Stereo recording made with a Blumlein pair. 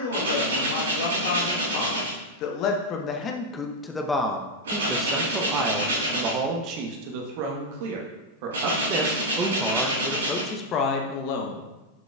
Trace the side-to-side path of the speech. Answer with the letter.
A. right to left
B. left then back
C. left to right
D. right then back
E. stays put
D.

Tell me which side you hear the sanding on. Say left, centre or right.
right.